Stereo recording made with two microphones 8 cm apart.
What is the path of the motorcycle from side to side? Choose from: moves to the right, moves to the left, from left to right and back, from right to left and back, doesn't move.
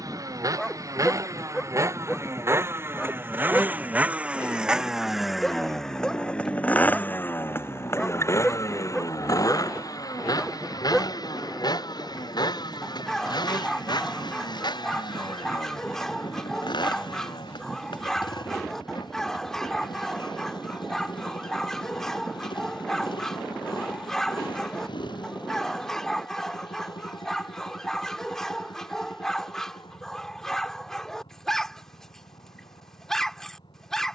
moves to the left.